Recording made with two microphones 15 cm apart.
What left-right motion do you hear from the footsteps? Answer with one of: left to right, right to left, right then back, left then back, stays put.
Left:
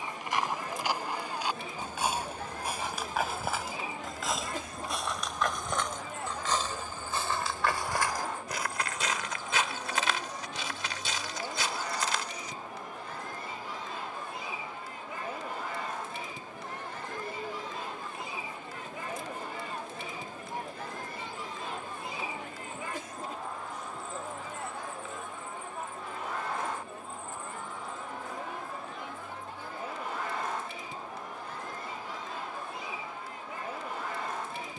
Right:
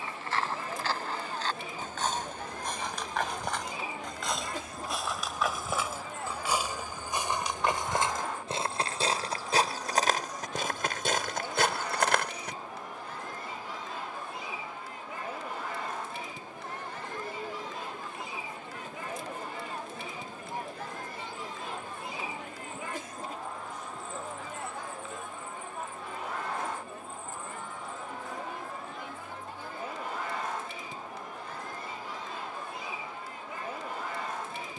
left to right.